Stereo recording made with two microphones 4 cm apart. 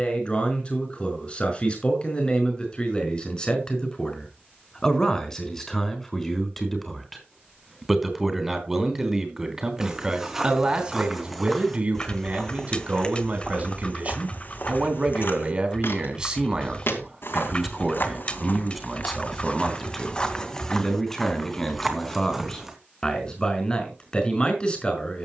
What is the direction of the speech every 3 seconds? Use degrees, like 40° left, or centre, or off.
30° left, 20° left, centre, 20° right, 40° right, 20° right, centre, 10° left, 20° left.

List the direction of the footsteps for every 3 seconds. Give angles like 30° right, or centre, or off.
off, off, off, 10° right, 30° left, 60° left, 30° left, centre, off.